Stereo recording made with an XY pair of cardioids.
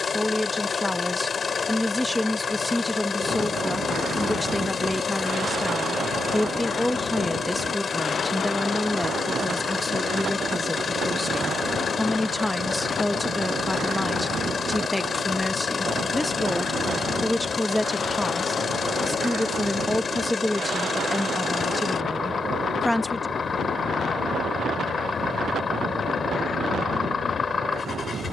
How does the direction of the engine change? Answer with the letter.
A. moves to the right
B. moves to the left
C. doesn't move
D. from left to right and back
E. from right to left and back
C.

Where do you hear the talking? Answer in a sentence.
In this clip you hear the talking in the centre.